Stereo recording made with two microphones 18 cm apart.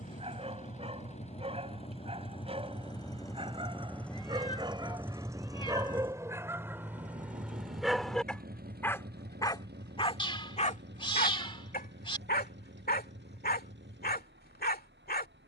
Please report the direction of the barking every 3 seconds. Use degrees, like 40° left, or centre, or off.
40° right, 30° right, 10° right, 40° left, 60° left.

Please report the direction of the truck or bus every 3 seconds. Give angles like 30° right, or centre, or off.
40° left, centre, 50° right, 70° right, 80° right.